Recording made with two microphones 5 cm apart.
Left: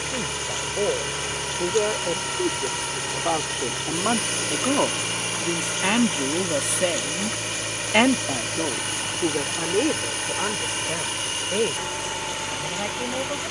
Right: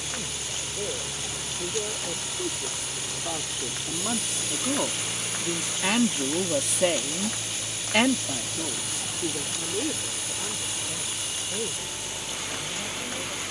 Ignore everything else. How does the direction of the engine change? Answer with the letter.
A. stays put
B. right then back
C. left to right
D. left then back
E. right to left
A.